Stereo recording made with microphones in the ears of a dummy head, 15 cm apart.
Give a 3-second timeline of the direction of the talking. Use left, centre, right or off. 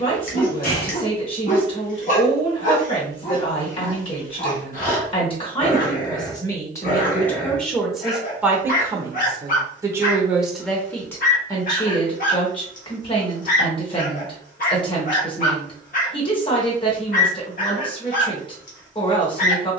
left, left, centre, centre, left, left, left.